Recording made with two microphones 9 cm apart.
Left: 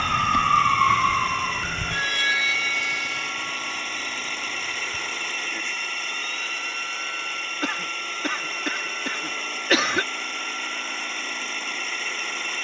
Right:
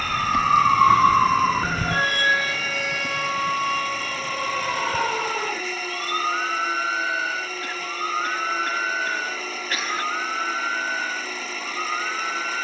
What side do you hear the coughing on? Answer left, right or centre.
left.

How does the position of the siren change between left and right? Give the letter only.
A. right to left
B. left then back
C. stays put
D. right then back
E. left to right
E.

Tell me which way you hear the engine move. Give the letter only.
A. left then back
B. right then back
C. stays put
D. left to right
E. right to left
C.